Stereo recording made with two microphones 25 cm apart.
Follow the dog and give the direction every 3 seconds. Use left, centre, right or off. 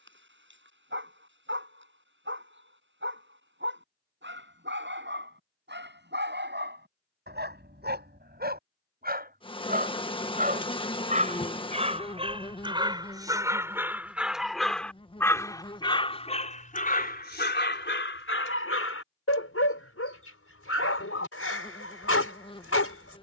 right, right, right, right, centre, left, left, left.